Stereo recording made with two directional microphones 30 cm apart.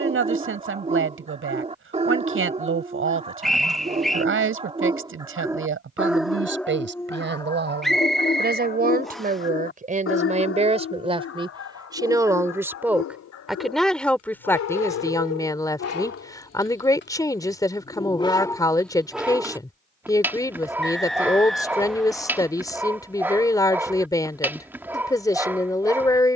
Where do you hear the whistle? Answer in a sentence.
You can hear the whistle in the centre.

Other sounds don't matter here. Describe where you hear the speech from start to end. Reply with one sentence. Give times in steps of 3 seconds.
In this clip you hear the speech on the right from 0 s and in the centre from 12 s.